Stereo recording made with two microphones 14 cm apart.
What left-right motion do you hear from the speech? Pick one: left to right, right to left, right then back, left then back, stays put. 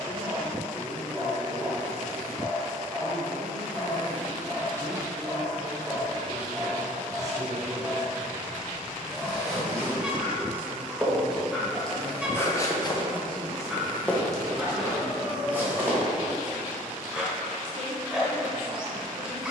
left to right.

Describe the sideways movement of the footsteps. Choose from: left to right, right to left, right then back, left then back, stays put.
left then back.